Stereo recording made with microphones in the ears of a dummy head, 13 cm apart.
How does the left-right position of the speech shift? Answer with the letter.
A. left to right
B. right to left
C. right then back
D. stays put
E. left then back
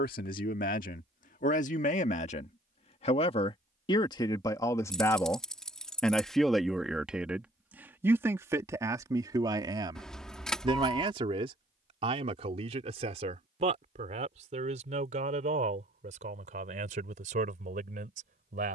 A.